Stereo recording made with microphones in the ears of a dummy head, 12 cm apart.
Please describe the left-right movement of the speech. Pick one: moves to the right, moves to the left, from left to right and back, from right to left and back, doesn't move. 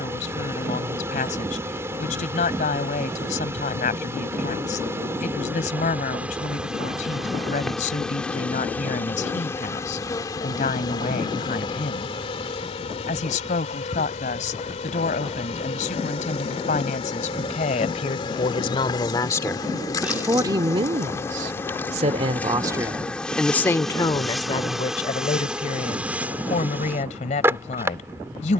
from left to right and back.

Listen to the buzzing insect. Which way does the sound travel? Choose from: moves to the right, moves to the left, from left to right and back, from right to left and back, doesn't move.
from right to left and back.